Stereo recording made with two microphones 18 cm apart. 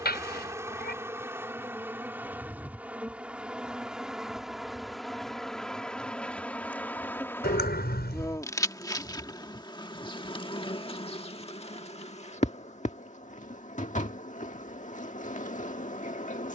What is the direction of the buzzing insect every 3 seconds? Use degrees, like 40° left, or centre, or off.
10° right, centre, 10° left, 30° left, 40° left, 40° left.